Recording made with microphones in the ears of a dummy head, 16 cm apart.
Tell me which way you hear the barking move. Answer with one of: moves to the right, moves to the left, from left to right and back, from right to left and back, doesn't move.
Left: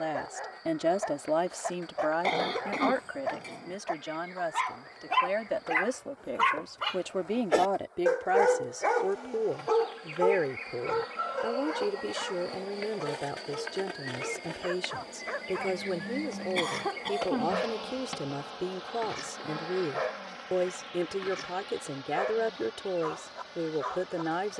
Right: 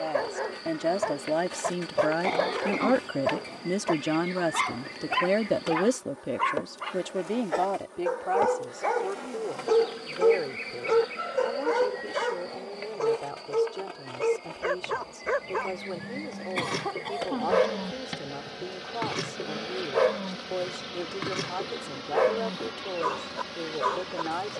from right to left and back.